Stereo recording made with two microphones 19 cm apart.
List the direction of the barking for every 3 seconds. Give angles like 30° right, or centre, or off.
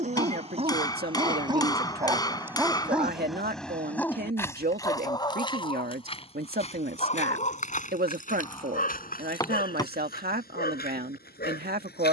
20° right, 10° left, 40° left, 60° left.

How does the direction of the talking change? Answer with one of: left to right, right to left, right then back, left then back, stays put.
stays put.